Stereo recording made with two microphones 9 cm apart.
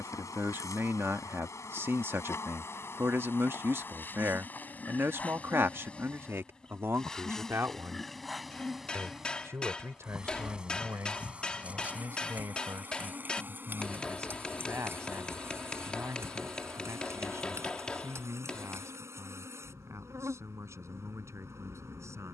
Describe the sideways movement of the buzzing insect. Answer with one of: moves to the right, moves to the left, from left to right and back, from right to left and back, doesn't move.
moves to the right.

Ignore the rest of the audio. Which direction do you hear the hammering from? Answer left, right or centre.
centre.